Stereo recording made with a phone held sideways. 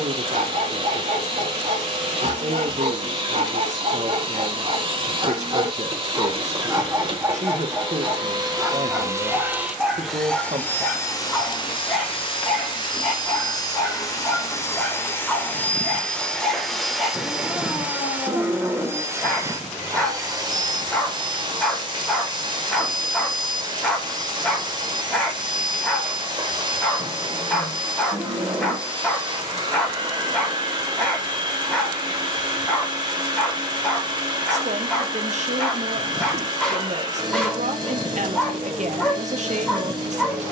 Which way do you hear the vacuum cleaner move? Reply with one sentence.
In this clip you hear the vacuum cleaner go left and come back.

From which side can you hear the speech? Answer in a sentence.
In this clip you hear the speech on the right.